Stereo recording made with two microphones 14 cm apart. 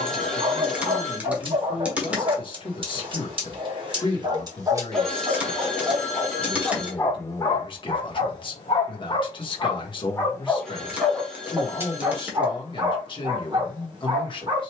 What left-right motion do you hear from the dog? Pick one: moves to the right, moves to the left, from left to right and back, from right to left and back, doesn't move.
from right to left and back.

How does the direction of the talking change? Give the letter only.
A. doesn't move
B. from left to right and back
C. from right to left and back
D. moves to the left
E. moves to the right
A.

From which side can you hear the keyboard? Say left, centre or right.
centre.